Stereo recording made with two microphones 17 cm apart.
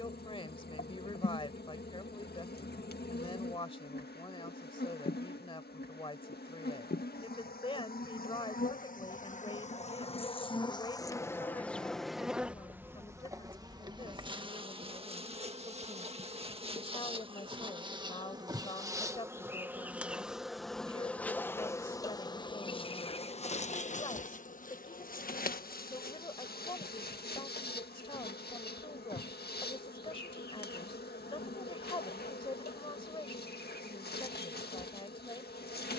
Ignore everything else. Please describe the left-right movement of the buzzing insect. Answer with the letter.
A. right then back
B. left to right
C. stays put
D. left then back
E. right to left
A.